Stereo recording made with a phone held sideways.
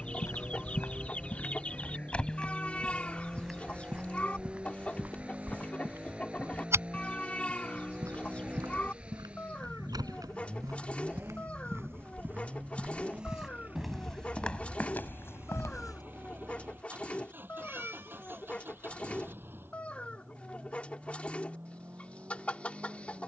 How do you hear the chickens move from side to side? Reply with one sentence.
You can hear the chickens stay in one place.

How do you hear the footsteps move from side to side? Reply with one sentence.
You can hear the footsteps go right and come back.